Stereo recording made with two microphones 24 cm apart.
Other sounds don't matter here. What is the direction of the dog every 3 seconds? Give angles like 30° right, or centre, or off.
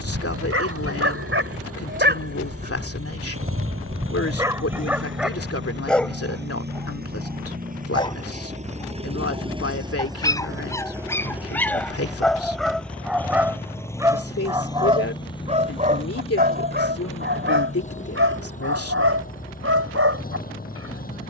50° right, 10° right, 10° left, 10° left, 10° right, 40° right, 60° right.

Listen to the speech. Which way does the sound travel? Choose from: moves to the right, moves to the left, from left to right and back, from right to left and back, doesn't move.
doesn't move.